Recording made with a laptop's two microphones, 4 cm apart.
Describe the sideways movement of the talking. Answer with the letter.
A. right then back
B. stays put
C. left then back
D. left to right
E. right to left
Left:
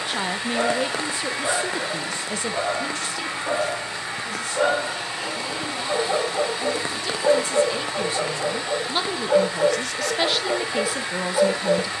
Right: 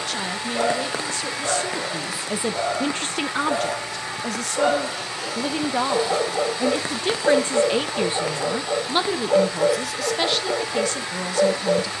A.